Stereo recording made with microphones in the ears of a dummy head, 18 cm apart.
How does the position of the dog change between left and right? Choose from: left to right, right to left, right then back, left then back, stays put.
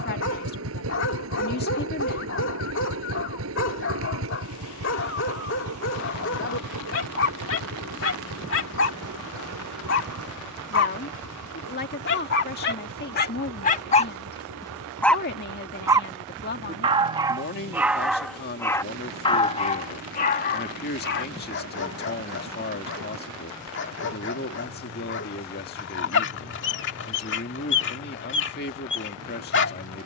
right then back.